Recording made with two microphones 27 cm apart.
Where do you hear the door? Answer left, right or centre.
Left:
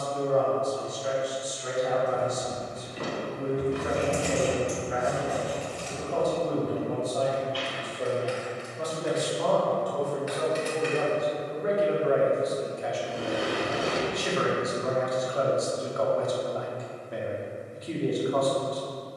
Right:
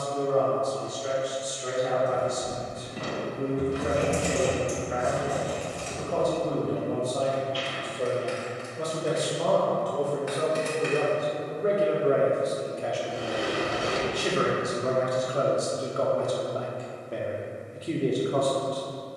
left.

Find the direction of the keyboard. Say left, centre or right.
right.